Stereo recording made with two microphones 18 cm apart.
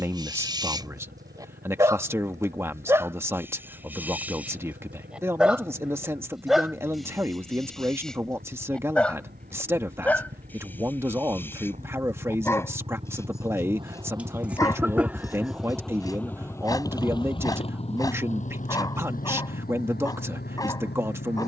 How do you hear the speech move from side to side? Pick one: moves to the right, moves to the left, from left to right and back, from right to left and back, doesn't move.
doesn't move.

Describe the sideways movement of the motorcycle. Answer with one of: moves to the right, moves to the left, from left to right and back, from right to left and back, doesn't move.
moves to the left.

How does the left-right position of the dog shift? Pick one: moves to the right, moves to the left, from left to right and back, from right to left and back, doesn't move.
moves to the left.